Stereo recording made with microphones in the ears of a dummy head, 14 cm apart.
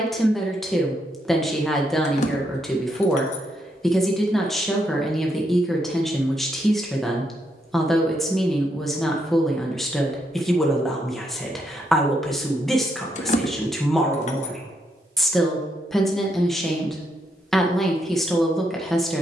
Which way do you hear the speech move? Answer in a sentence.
You can hear the speech stay in one place.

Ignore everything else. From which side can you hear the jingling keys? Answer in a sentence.
In this clip you hear the jingling keys on the left.